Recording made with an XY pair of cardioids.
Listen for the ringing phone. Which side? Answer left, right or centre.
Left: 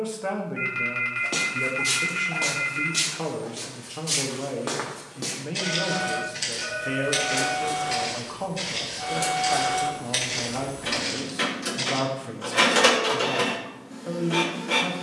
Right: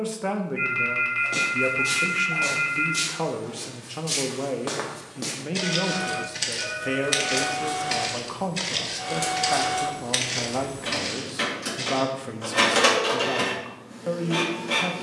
centre.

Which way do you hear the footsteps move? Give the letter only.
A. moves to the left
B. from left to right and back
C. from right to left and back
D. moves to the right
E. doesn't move
B.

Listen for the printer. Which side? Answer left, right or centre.
centre.